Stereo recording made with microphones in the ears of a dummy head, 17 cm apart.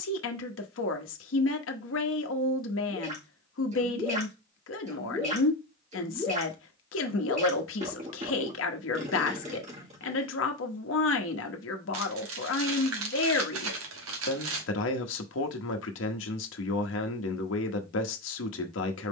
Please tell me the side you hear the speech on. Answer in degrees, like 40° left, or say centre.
70° left.